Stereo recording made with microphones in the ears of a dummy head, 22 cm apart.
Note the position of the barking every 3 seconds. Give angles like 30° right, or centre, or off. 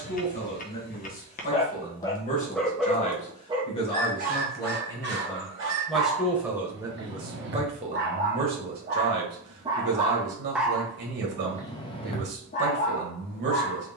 30° left, 40° right, 50° right, centre, 30° left.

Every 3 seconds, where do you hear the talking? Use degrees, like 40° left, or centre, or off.
40° left, 20° left, 20° right, 50° right, 50° right.